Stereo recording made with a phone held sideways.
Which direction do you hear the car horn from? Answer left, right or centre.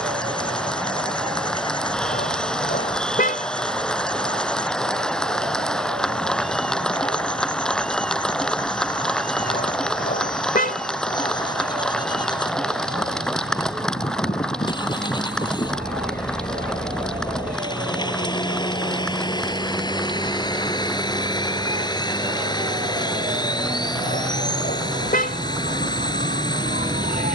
left.